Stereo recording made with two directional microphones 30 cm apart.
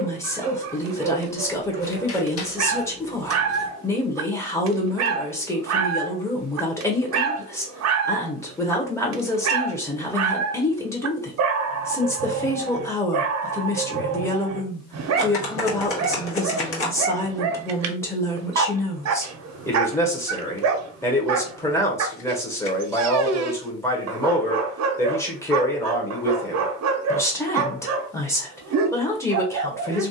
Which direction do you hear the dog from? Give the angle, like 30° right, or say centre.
60° right.